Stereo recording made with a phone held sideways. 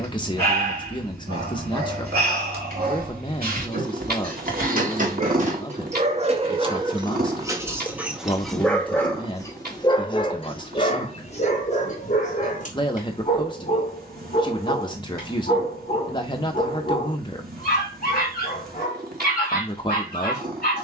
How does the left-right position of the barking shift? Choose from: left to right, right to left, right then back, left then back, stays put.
right to left.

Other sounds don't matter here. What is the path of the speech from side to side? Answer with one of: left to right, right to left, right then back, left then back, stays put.
stays put.